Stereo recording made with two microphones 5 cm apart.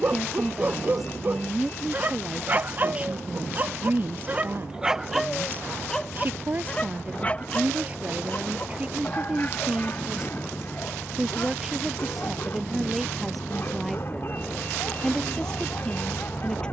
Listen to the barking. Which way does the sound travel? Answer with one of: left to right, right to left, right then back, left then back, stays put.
right to left.